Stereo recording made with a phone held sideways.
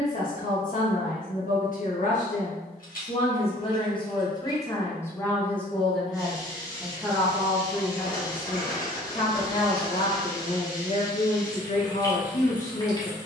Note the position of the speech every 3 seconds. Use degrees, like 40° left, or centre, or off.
60° left, 20° left, centre, 50° left, 50° left.